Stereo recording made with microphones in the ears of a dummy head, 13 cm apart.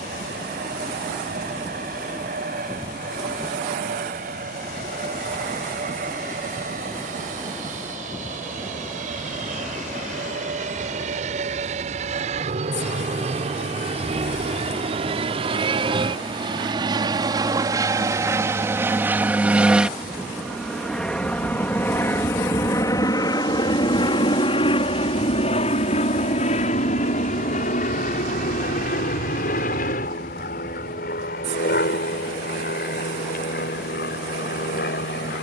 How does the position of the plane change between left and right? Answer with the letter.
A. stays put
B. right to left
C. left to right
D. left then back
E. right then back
B.